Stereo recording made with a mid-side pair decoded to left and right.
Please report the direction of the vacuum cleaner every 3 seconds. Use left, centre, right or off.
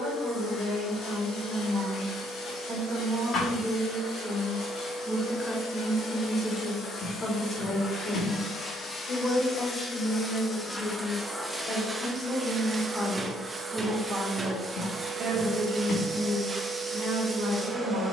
left, left, left, centre, right, right.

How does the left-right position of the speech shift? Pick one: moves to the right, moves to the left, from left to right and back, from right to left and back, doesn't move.
from right to left and back.